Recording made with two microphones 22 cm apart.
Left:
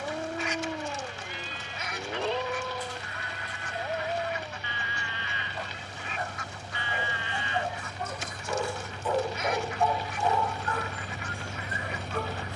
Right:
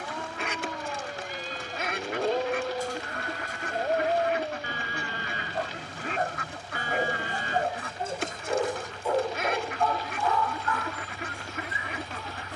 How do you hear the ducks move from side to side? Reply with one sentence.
You can hear the ducks stay in one place.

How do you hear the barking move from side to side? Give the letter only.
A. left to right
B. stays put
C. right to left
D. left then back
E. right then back
E.